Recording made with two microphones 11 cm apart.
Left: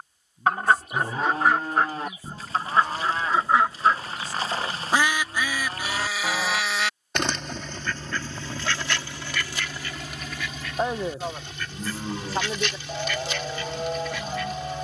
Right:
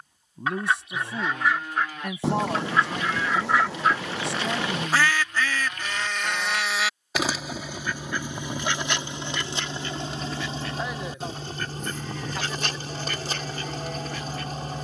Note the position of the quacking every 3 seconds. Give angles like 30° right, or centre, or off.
40° left, 20° left, 10° right, 30° right, 40° right.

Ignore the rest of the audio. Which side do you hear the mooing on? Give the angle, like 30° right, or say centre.
30° left.